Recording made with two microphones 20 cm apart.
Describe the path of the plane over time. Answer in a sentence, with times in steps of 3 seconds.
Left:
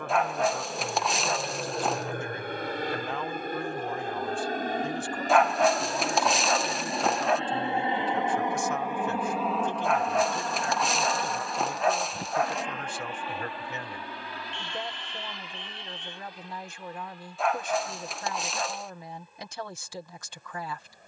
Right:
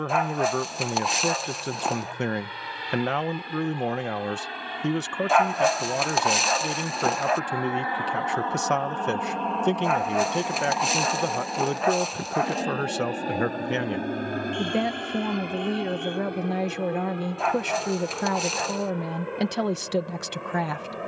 You can hear the plane on the left from 0 s, in the centre from 9 s and on the right from 12 s.